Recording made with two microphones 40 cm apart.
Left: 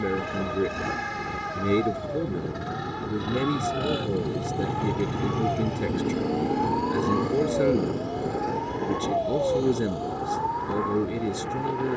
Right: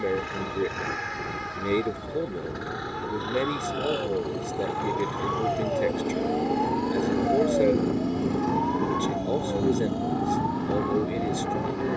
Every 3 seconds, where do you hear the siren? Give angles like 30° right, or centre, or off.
60° left, 40° left, 10° left, 40° right.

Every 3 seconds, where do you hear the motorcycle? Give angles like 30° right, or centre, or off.
50° left, 30° left, 30° right, 70° right.